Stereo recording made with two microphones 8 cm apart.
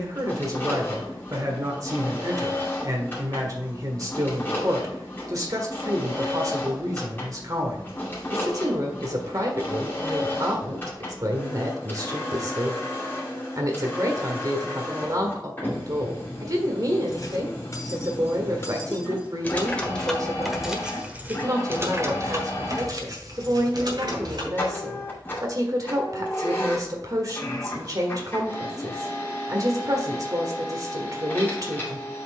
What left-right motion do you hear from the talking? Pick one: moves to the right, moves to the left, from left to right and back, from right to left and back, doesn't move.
doesn't move.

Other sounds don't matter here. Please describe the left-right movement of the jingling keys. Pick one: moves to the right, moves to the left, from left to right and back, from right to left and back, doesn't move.
moves to the right.